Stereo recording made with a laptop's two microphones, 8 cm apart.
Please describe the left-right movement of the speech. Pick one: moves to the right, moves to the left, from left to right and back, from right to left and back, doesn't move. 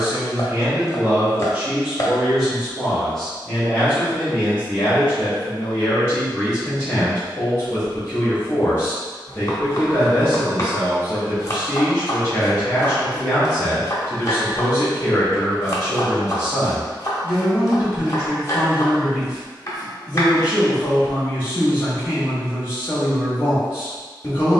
moves to the left.